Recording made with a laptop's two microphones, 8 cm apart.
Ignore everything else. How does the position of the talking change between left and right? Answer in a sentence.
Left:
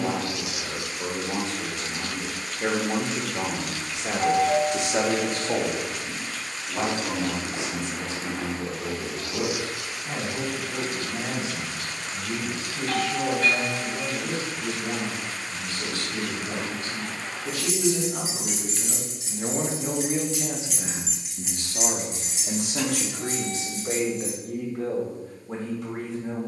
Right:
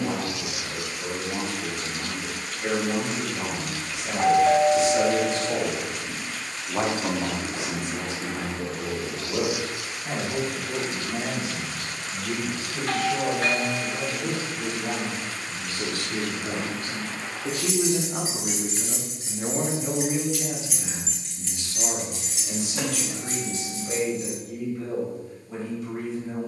You can hear the talking go right and come back.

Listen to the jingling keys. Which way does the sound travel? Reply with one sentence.
In this clip you hear the jingling keys move to the left.